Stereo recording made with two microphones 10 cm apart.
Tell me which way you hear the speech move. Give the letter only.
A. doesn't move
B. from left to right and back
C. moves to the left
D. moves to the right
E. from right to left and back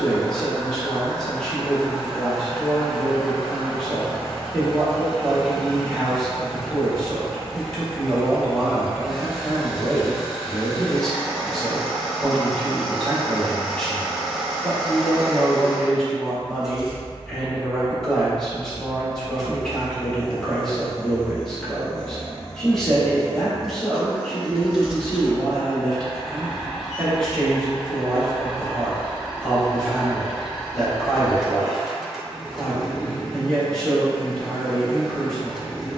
A.